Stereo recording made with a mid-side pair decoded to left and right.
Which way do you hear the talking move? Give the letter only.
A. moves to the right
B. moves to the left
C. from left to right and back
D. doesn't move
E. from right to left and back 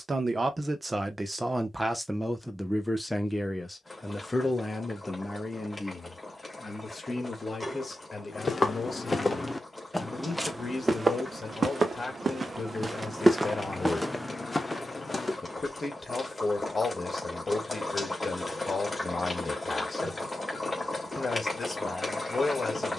B.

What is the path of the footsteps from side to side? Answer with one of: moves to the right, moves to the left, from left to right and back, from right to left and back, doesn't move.
from left to right and back.